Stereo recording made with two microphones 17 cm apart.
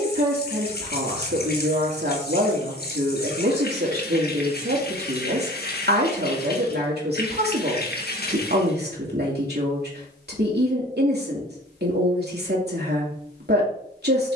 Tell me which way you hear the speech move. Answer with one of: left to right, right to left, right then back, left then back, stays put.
stays put.